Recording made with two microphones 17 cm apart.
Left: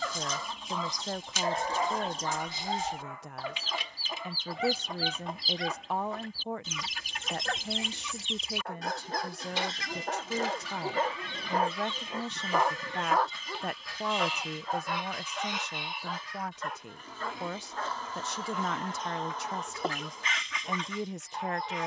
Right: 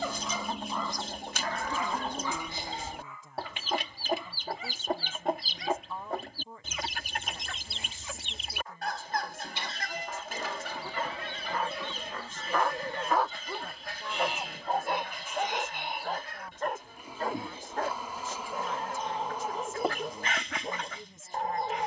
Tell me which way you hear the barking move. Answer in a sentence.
You can hear the barking go left and come back.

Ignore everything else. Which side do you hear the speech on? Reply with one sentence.
You can hear the speech on the left.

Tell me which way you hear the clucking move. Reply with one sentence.
You can hear the clucking stay in one place.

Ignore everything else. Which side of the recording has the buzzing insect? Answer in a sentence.
You can hear the buzzing insect in the centre.